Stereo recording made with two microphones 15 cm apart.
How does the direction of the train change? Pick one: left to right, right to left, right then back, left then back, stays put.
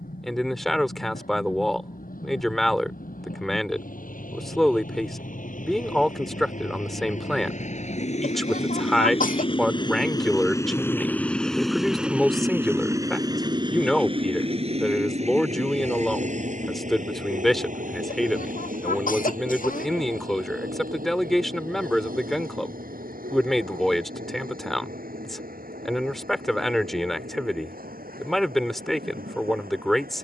left to right.